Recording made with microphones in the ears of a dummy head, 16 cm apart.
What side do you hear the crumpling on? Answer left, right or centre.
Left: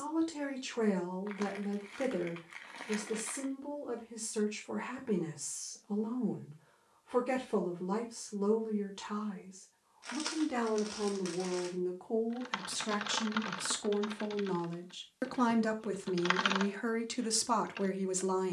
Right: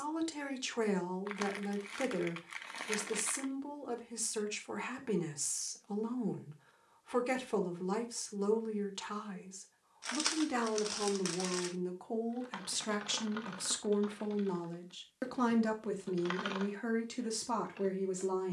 right.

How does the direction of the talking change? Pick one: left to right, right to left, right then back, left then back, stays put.
right to left.